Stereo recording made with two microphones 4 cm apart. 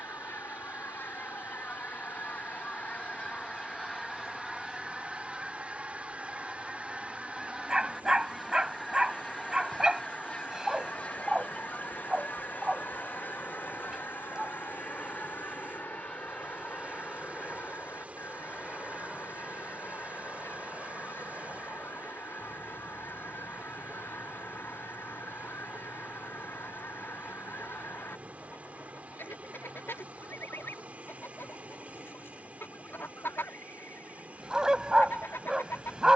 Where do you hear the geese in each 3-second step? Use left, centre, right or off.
left, centre, centre, left, left, left, left, left, left, left, left, left.